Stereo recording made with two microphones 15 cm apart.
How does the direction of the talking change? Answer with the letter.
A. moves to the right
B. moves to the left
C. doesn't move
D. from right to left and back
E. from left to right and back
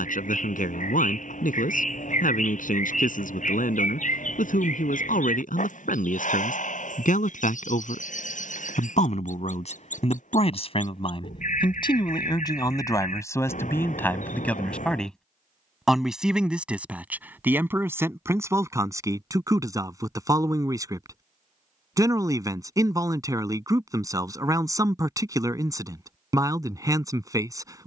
A.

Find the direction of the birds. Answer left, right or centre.
left.